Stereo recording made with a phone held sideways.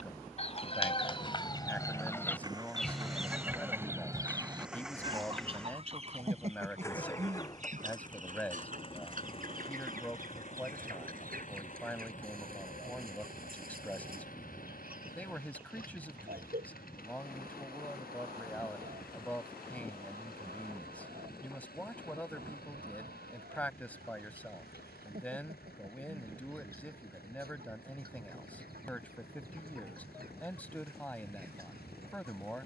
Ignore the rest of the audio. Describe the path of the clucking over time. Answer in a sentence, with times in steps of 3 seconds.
In this clip you hear the clucking on the left from 0 s and on the right from 3 s.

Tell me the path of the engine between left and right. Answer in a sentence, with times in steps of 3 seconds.
You can hear the engine on the right from 0 s, in the centre from 3 s and on the left from 6 s.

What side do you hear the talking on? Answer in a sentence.
In this clip you hear the talking in the centre.